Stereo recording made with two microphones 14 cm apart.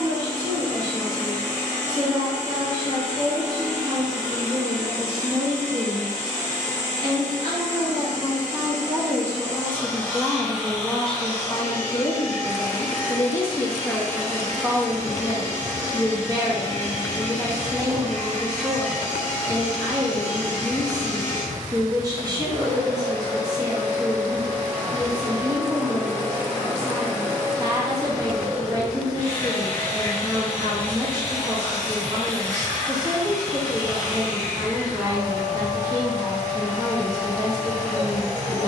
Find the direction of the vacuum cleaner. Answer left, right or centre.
right.